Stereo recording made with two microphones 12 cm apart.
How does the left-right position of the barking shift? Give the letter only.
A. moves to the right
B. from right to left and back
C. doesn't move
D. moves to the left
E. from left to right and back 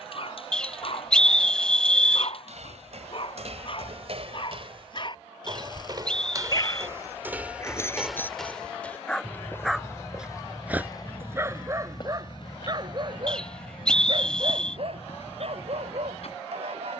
A.